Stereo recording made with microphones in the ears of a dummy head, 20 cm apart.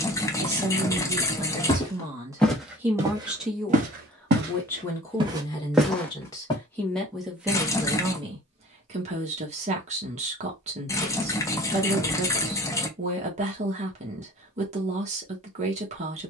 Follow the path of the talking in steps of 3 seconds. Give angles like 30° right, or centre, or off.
20° right, 10° left, 10° right, 30° right, 30° right, 30° right.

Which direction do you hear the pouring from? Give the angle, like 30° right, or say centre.
10° left.